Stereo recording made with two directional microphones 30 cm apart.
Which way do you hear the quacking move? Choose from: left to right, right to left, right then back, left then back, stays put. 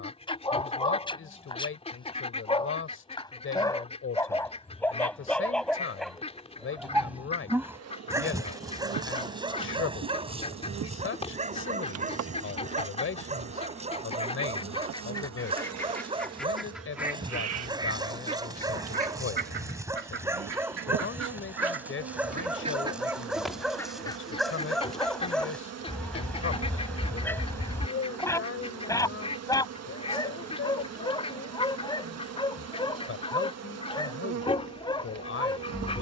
right then back.